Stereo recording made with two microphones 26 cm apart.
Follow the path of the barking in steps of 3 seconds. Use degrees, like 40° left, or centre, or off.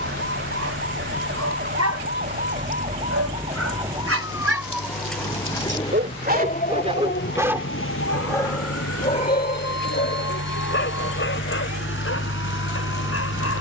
70° right, 60° right, 10° right, 40° left, 60° left.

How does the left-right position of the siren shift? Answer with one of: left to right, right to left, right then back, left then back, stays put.
right to left.